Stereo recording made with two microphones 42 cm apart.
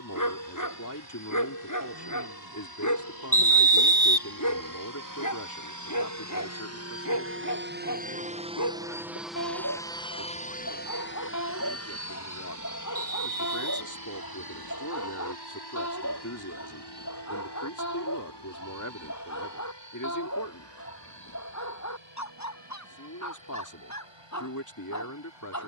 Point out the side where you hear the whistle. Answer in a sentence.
In this clip you hear the whistle in the centre.